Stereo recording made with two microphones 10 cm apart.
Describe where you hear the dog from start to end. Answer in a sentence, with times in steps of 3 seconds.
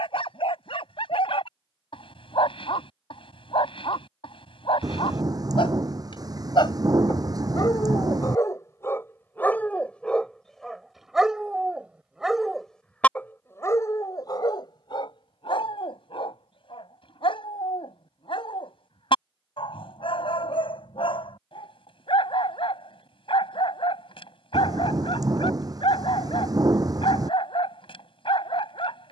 You can hear the dog on the left from 0 s, in the centre from 9 s and on the left from 12 s.